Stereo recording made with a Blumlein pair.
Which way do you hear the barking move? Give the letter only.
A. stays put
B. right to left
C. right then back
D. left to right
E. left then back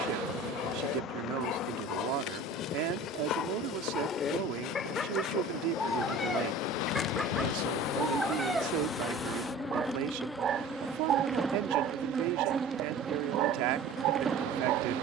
D.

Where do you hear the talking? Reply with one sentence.
You can hear the talking on the right.